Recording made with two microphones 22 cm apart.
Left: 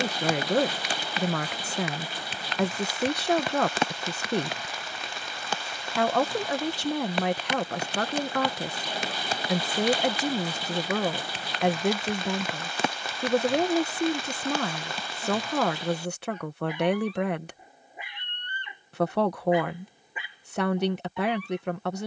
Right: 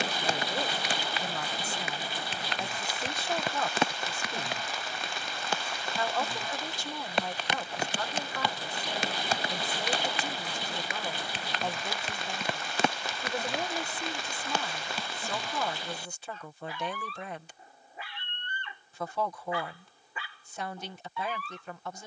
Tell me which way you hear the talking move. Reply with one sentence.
You can hear the talking stay in one place.